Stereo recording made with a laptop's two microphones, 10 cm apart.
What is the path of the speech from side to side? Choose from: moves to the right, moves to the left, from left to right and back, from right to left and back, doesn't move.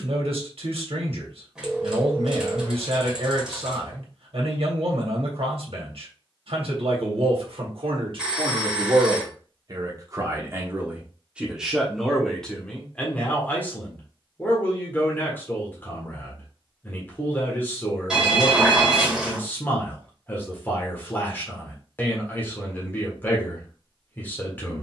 moves to the left.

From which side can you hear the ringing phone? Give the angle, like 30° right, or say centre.
10° right.